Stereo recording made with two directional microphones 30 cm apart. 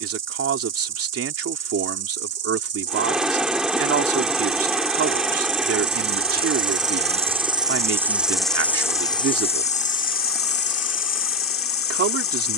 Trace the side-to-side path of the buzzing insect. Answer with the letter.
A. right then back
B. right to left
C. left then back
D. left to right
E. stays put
B.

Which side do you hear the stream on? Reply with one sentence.
In this clip you hear the stream in the centre.